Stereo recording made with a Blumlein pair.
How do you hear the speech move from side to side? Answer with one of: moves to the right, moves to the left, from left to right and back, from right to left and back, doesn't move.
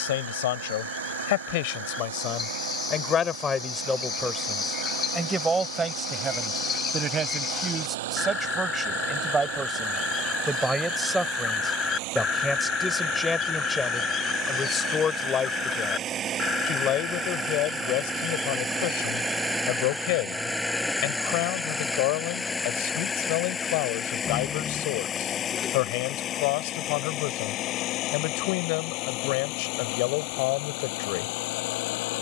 from left to right and back.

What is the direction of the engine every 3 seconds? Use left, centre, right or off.
right, right, right, right, right, right, centre, centre, left, left, left.